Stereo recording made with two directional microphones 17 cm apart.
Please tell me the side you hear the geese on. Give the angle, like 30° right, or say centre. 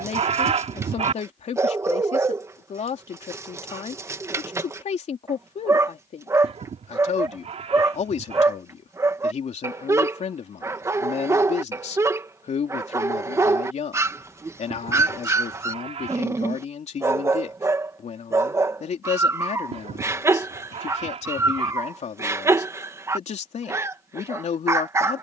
40° right.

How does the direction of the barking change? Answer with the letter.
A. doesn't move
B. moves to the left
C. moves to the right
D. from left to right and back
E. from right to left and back
A.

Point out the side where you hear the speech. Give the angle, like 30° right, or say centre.
40° left.